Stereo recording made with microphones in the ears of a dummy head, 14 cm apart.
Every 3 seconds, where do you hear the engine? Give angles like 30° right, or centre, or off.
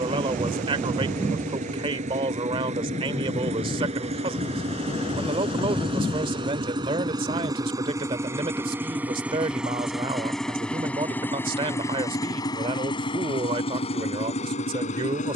50° right, 40° right, 20° right, centre, 40° left.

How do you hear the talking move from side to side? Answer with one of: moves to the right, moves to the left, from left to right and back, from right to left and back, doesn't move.
doesn't move.